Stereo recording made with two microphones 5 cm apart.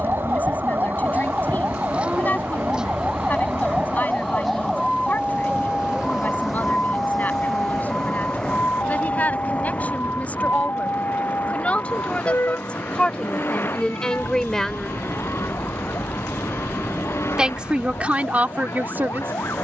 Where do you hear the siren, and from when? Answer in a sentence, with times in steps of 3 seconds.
You can hear the siren on the right from 0 s, in the centre from 3 s and on the left from 6 s.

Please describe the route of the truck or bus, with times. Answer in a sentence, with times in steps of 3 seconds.
In this clip you hear the truck or bus on the right from 0 s, in the centre from 6 s and on the left from 9 s.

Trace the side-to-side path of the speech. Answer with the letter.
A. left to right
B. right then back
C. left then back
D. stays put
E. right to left
A.